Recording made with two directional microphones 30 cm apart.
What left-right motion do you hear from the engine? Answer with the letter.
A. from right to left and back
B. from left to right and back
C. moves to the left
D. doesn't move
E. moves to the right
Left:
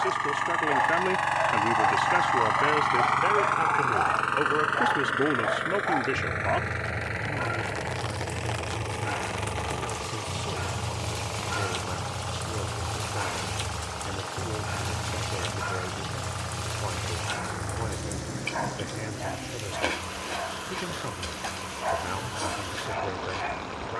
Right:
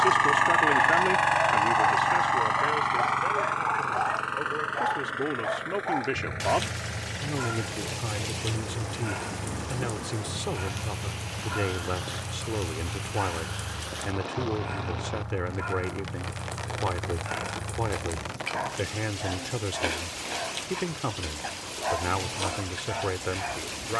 C.